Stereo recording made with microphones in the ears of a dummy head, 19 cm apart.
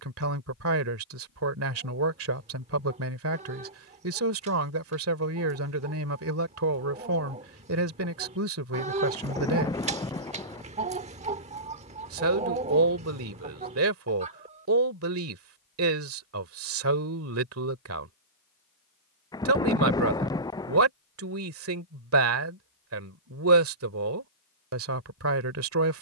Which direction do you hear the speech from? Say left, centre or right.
right.